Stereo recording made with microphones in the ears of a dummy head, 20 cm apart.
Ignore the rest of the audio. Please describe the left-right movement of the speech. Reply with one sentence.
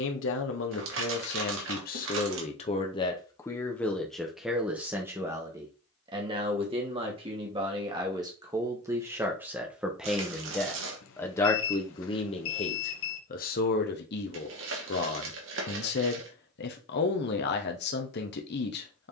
In this clip you hear the speech move from left to right and back again.